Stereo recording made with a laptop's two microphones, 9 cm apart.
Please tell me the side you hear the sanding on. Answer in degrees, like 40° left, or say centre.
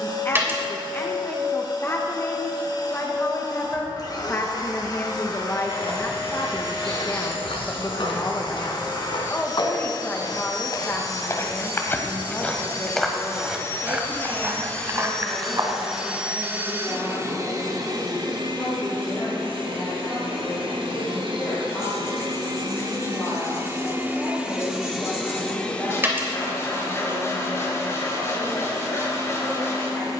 30° left.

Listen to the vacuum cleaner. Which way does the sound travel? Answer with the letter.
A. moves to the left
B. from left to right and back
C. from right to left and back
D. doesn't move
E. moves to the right
B.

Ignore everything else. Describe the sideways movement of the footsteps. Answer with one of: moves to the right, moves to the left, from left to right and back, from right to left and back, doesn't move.
moves to the right.